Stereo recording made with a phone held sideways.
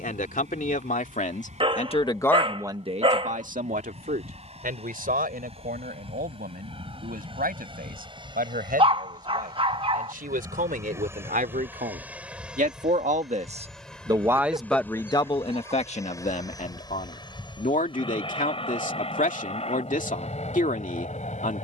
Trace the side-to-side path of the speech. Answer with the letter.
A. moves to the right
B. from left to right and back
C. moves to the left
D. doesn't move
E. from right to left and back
B.